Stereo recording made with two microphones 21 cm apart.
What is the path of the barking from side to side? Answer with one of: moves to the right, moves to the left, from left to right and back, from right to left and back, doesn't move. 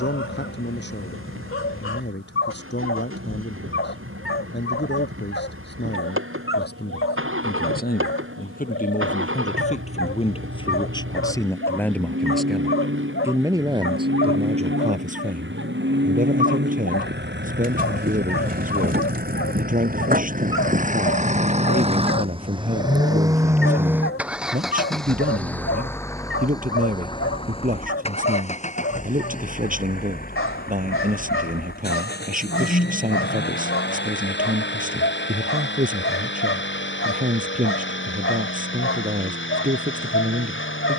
doesn't move.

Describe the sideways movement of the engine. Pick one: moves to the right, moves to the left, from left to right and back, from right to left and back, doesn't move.
moves to the left.